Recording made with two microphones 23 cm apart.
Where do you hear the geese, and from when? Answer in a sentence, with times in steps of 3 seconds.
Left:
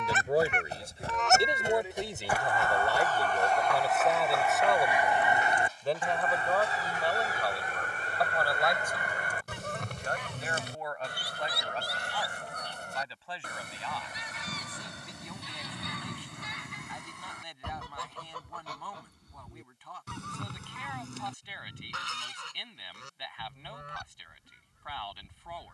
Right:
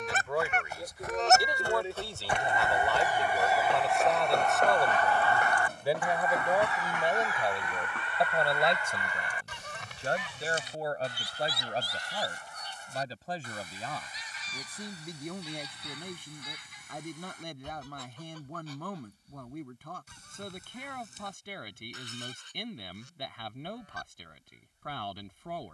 You can hear the geese on the right from 0 s, in the centre from 3 s and on the left from 6 s.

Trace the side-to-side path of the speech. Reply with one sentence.
In this clip you hear the speech travel towards the right.